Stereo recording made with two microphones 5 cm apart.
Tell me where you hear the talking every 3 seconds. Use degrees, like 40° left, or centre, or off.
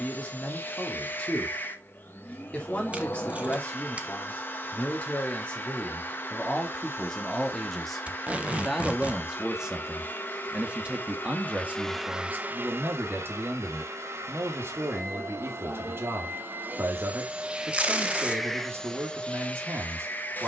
20° left, 20° left, 10° left, 20° right, 50° right, 60° right, 60° right.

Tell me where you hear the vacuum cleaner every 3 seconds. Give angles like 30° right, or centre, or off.
40° left, 40° left, 40° left, 40° left, 60° right, 40° right, 20° left.